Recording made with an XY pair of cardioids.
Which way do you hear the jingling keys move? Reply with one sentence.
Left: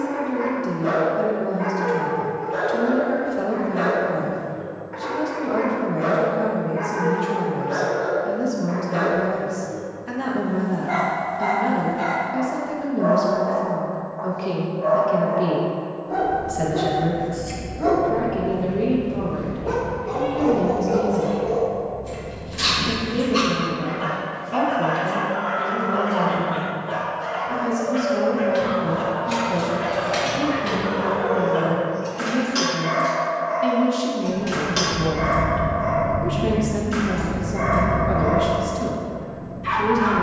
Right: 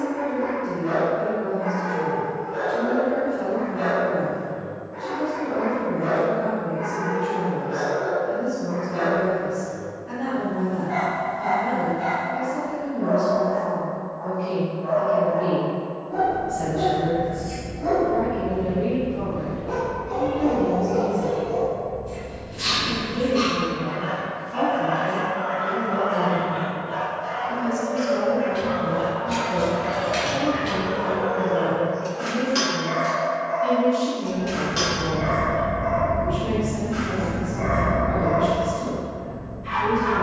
You can hear the jingling keys move from left to right and back again.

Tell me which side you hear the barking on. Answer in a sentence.
In this clip you hear the barking on the left.